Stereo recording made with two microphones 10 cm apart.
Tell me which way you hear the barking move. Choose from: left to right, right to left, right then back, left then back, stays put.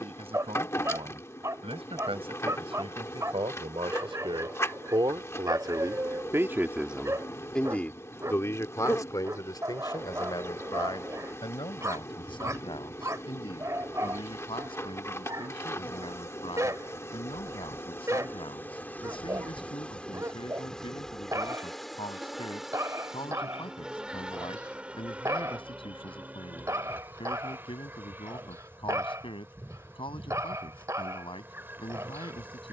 stays put.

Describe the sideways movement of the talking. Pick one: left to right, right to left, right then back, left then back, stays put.
right to left.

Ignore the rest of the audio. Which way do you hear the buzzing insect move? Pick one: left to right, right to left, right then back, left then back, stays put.
left to right.